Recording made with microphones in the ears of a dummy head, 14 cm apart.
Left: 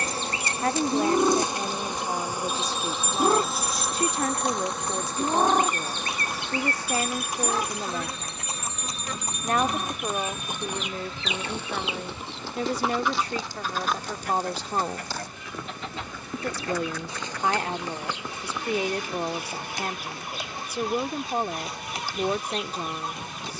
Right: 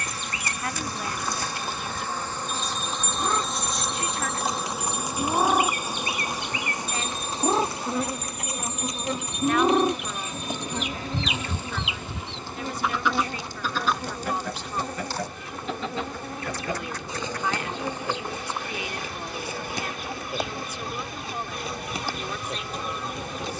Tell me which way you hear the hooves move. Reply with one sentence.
You can hear the hooves travel towards the left.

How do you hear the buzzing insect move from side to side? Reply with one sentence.
You can hear the buzzing insect move from left to right.